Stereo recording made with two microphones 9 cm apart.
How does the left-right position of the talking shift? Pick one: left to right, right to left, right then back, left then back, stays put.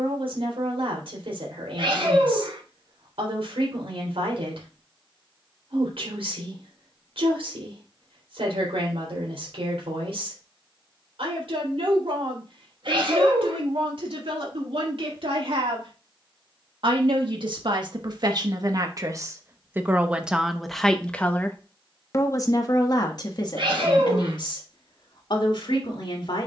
right to left.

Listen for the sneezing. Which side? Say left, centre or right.
right.